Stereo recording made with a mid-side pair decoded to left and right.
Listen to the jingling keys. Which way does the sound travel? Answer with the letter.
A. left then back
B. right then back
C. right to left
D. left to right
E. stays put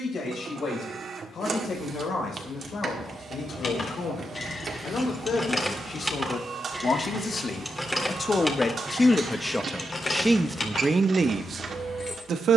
B.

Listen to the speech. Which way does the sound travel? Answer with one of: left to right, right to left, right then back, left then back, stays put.
left to right.